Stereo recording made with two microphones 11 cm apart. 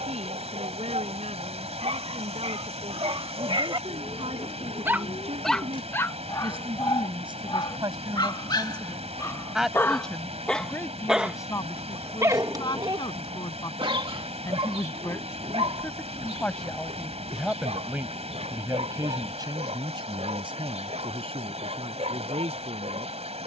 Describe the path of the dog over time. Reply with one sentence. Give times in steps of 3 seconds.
You can hear the dog on the right from 0 s, on the left from 6 s, in the centre from 9 s and on the right from 12 s.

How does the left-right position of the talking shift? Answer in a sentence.
You can hear the talking go left and come back.